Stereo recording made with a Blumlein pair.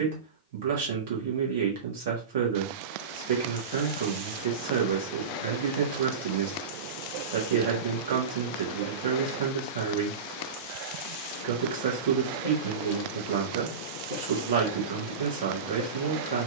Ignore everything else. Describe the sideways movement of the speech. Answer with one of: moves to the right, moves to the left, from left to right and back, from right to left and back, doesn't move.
doesn't move.